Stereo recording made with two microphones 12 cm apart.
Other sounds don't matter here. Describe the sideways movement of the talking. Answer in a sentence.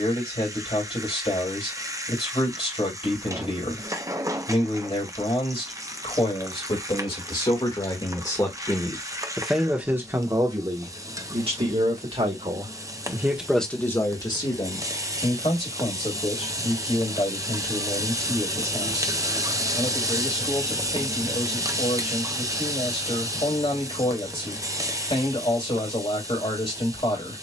In this clip you hear the talking go right and come back.